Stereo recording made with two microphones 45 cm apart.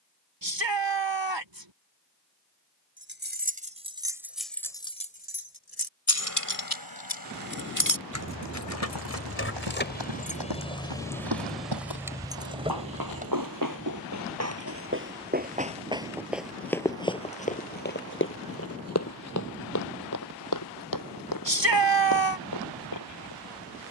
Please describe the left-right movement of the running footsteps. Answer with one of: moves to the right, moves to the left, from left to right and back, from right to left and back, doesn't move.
moves to the left.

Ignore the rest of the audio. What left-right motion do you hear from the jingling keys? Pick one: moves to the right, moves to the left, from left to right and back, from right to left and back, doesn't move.
from right to left and back.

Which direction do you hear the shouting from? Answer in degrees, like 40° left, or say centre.
80° right.